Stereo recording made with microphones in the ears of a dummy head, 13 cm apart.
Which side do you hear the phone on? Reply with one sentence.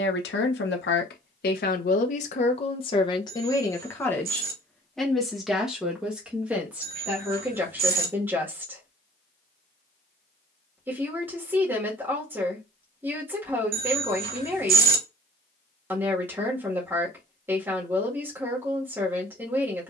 In this clip you hear the phone on the right.